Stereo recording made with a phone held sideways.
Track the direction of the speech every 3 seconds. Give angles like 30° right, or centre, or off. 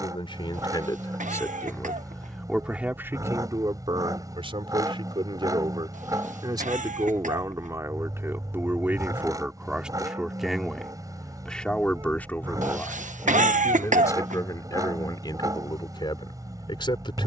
20° left, 30° right, 20° right, centre, 20° left, 30° left.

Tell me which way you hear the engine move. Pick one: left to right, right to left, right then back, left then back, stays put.
stays put.